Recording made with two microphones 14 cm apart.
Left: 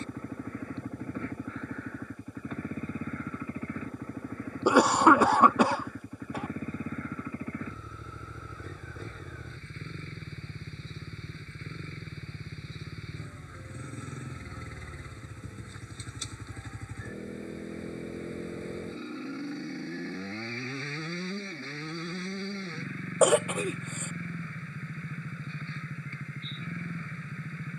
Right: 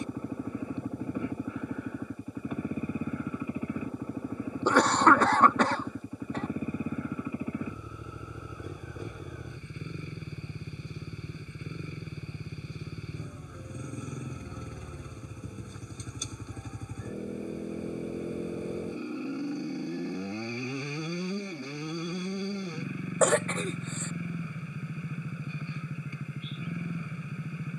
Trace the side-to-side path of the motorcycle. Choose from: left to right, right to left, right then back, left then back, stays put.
stays put.